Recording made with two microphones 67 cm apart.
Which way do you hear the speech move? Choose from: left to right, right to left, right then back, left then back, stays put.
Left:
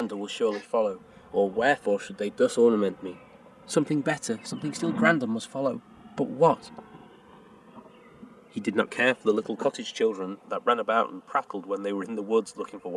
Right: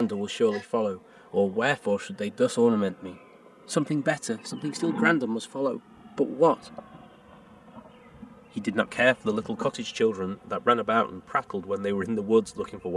left then back.